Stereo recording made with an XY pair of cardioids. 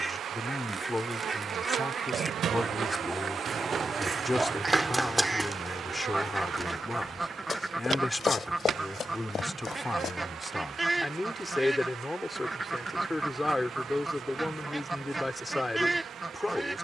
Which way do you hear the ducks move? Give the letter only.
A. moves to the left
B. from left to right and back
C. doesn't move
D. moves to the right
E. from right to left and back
C.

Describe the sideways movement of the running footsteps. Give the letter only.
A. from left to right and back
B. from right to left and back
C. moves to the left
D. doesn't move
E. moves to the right
C.